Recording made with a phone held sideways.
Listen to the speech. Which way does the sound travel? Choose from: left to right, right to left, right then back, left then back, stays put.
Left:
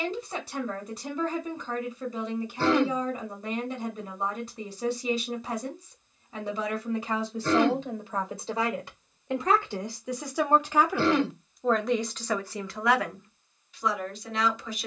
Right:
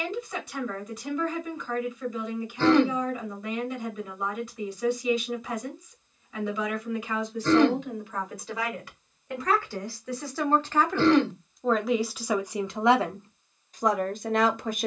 left to right.